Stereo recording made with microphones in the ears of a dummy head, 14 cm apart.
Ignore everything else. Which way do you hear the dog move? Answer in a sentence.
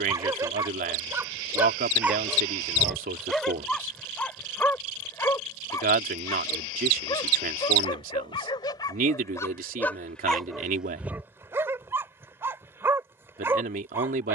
In this clip you hear the dog move from right to left and back again.